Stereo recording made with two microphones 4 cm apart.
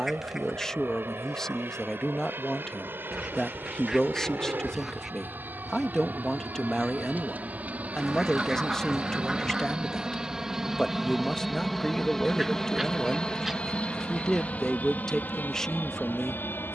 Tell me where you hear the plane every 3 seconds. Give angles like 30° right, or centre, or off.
60° right, 50° right, 40° right, 10° right, 20° left, 40° left.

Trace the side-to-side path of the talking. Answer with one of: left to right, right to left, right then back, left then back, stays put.
stays put.